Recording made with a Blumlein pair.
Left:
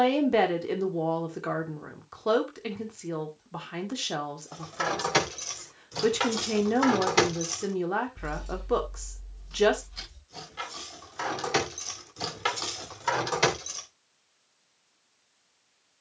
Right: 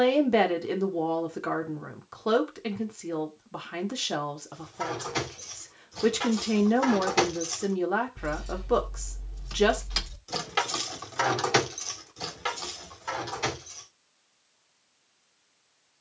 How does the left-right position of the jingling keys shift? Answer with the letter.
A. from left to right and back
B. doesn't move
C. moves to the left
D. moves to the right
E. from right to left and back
A.